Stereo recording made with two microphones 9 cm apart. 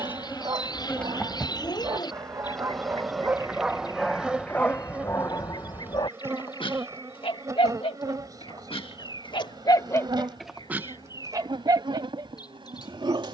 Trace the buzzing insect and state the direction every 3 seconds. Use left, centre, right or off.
centre, centre, right, right, right.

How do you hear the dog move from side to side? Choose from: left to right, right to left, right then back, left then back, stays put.
left then back.